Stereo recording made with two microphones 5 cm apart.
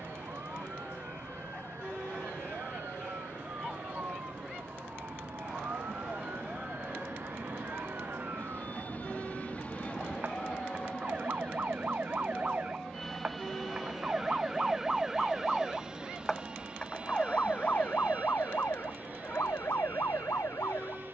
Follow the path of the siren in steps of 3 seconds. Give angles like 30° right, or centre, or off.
60° right, 60° right, 50° right, 40° right, 20° right, 20° left, 60° left.